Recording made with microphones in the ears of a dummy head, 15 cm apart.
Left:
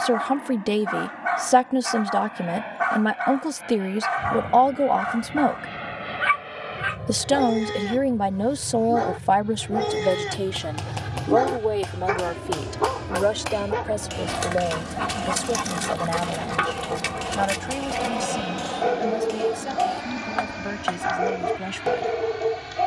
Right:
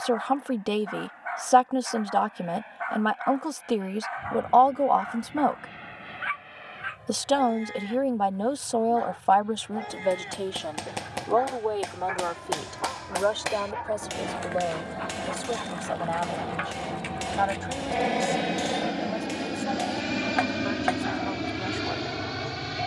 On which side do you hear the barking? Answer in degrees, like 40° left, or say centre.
80° left.